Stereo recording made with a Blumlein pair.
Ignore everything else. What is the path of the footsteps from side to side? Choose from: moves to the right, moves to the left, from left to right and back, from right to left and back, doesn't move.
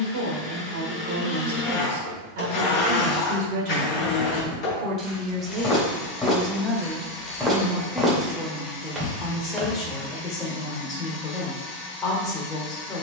moves to the right.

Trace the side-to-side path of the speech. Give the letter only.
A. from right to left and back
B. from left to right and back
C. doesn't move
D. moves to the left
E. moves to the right
D.